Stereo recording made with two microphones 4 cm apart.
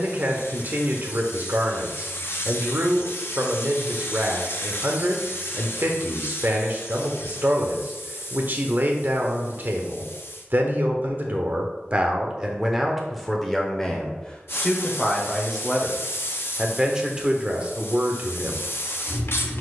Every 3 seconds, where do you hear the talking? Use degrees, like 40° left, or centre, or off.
50° right, 50° right, 50° right, 50° right, centre, 10° right, 40° right.